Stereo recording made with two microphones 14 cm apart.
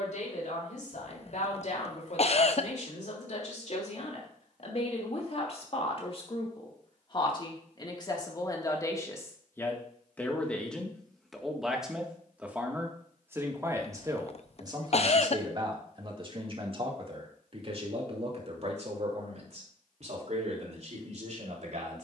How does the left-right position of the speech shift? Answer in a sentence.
In this clip you hear the speech travel towards the right.